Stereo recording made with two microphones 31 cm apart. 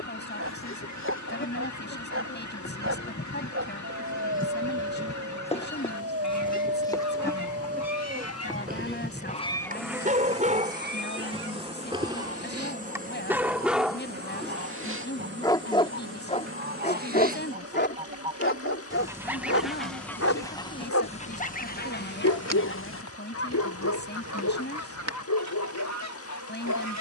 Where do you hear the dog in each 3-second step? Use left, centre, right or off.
right, right, right, right, centre, left, left, left, left.